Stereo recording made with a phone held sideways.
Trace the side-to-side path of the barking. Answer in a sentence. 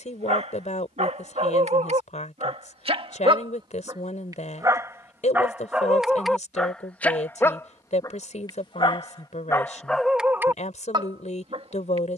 In this clip you hear the barking move from right to left and back again.